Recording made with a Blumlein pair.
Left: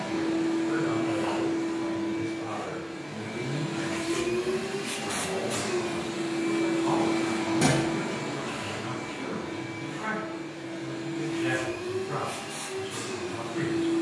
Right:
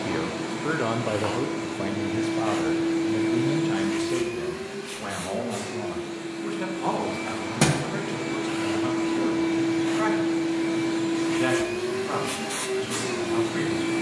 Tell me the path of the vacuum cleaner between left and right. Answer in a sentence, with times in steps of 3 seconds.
In this clip you hear the vacuum cleaner on the right from 0 s, in the centre from 3 s and on the right from 9 s.